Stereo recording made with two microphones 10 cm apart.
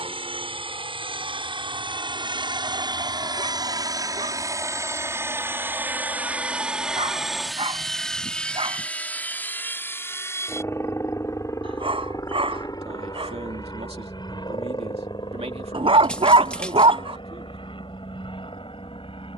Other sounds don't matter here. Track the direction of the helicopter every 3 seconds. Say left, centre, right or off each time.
right, right, centre, left, left, left, left.